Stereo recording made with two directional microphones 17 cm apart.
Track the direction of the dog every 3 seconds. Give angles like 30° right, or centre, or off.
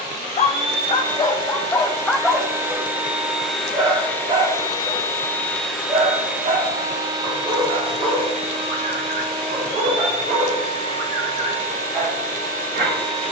20° left, 30° right, 50° right, 50° right, 60° right.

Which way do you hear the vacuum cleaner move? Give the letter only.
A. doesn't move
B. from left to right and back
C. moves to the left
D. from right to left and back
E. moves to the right
D.